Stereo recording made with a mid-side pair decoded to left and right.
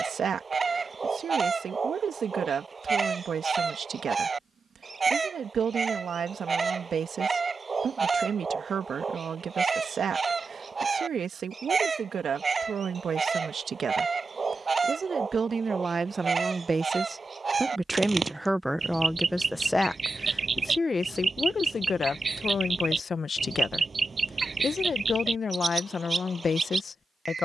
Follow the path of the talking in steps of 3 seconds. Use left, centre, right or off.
right, right, right, right, right, right, centre, left, left.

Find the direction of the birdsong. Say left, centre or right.
right.